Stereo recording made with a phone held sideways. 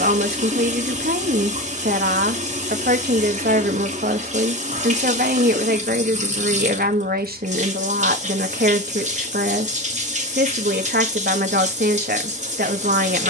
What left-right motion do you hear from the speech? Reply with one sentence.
In this clip you hear the speech stay put.